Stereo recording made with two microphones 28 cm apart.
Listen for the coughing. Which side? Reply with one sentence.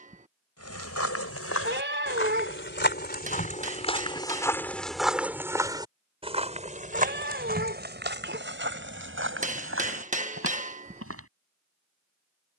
You can hear the coughing on the right.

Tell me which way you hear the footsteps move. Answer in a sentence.
You can hear the footsteps move from left to right.